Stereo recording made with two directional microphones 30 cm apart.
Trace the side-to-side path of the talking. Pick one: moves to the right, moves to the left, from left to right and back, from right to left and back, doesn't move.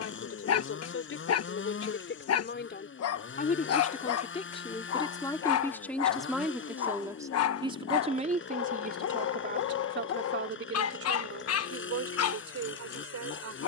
moves to the right.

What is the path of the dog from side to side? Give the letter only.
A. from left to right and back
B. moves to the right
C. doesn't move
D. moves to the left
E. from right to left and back
C.